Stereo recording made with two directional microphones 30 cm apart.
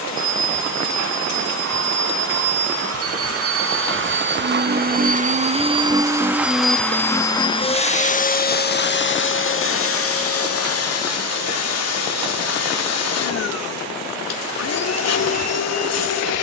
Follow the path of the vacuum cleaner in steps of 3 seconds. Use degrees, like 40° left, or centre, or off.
60° right, 30° right, 10° left, 50° left, 60° left, 60° left.